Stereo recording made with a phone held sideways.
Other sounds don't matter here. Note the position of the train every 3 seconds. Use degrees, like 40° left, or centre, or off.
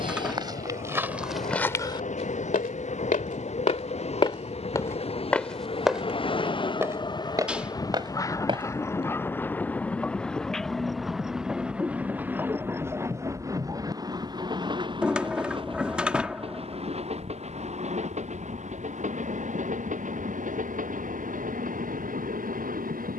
50° left, 40° left, 30° left, centre, 20° right, 40° right, 50° right, 60° right.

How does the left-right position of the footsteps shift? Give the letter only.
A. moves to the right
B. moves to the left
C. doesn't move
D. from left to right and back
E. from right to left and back
E.